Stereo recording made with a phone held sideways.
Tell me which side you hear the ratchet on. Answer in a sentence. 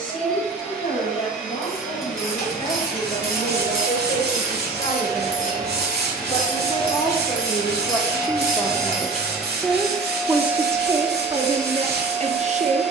You can hear the ratchet on the left.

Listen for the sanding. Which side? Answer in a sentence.
In this clip you hear the sanding on the right.